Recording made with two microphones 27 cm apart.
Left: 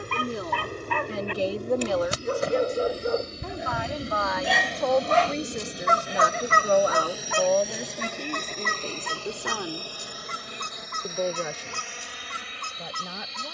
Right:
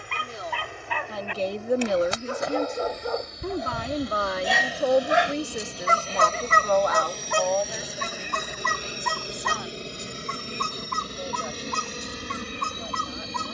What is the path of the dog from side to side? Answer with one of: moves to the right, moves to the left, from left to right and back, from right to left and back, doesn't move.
moves to the right.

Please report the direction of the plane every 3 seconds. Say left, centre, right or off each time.
left, left, centre, right, right.